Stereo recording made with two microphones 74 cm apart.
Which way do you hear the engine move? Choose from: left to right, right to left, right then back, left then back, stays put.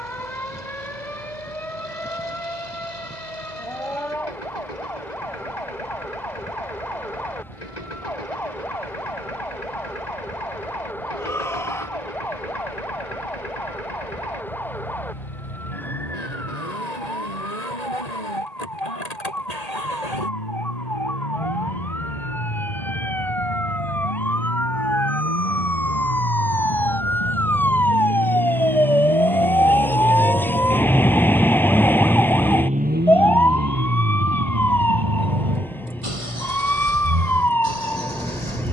left to right.